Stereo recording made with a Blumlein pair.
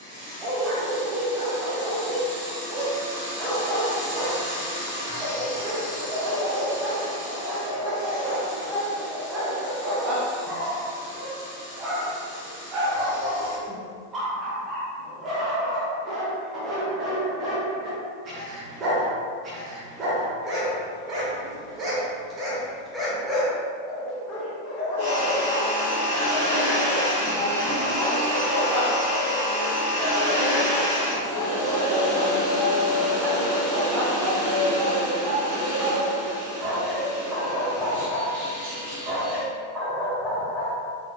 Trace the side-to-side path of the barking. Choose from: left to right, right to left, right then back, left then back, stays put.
left then back.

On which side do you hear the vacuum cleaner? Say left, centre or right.
right.